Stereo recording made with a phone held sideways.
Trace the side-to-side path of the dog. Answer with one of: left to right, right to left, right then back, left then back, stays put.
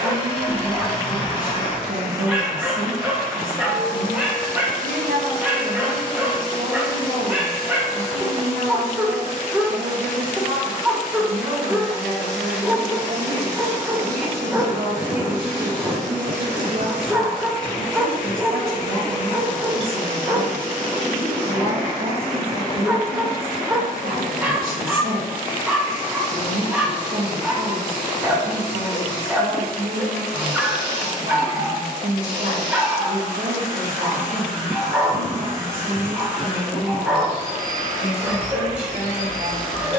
stays put.